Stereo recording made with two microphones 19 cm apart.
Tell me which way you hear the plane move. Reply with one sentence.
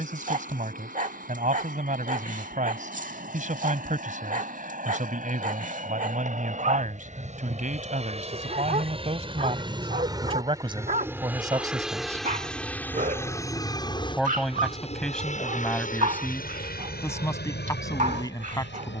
You can hear the plane travel towards the left.